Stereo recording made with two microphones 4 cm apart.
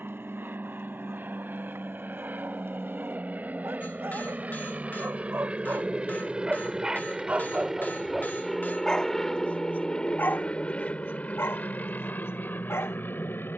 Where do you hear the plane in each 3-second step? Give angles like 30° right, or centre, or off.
50° right, 40° right, 10° right, 20° left, 40° left.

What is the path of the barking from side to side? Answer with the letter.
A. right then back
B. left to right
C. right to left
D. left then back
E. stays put
C.